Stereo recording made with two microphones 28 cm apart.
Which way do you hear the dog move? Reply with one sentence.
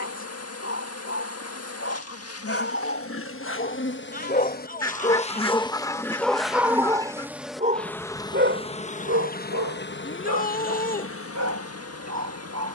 You can hear the dog move from left to right.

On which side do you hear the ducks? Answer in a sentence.
You can hear the ducks in the centre.